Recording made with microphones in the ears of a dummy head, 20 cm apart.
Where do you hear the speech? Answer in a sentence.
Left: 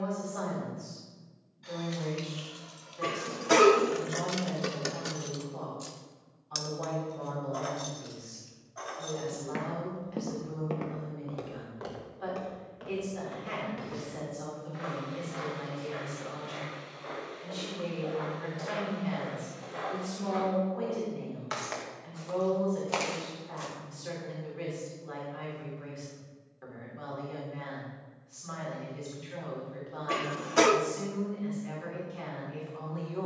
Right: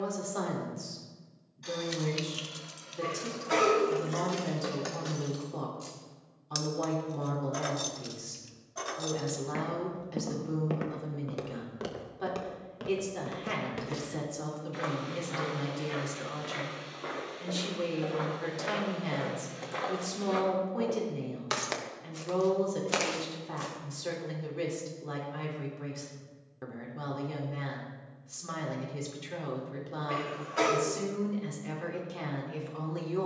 In this clip you hear the speech on the right.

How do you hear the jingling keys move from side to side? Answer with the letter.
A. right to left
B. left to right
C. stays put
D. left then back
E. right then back
D.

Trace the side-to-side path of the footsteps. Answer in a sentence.
In this clip you hear the footsteps move from left to right and back again.